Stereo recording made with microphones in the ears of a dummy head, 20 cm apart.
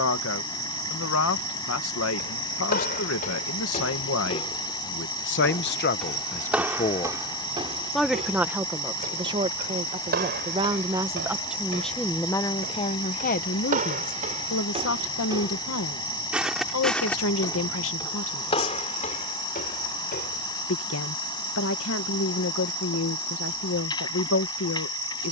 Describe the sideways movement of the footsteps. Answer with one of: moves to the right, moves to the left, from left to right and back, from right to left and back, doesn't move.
from left to right and back.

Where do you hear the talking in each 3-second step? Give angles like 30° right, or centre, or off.
70° left, 60° left, 10° left, 20° right, 40° left, 70° left, 70° left, 70° left, 70° left.